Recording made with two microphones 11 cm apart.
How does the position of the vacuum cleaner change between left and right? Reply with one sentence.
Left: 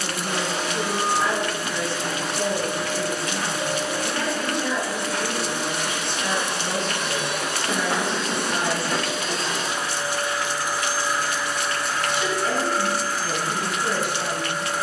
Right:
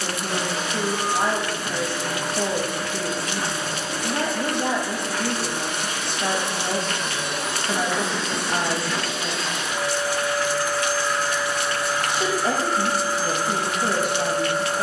You can hear the vacuum cleaner move to the right.